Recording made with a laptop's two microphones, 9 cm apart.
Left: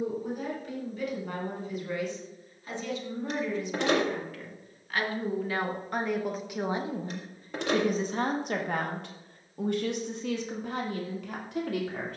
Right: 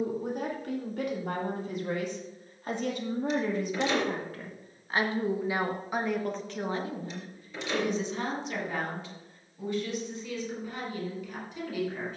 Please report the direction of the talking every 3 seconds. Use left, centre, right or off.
right, right, left, left.